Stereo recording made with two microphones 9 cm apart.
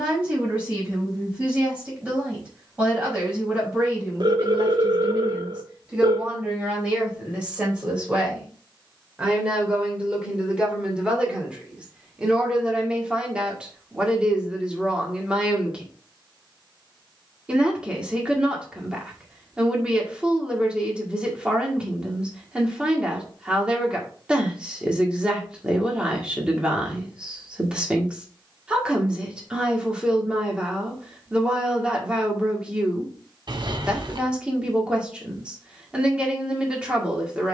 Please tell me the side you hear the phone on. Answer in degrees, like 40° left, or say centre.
60° right.